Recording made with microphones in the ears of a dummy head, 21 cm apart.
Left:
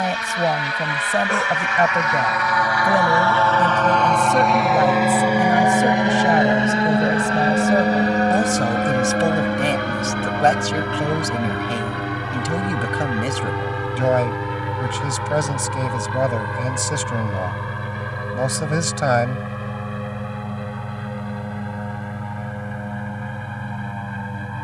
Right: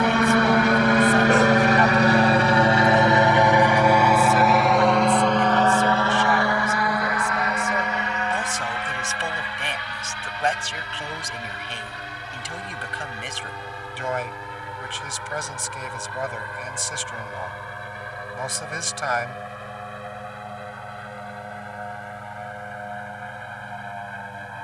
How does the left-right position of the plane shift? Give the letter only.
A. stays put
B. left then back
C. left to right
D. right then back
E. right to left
E.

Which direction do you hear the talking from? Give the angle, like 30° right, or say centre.
40° left.